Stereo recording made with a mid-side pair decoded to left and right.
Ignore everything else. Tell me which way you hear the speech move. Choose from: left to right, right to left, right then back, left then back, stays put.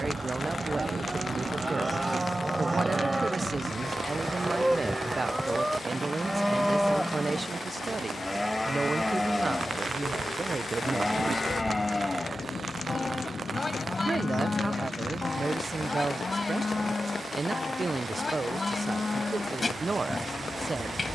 stays put.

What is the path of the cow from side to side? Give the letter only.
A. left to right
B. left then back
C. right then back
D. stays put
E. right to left
E.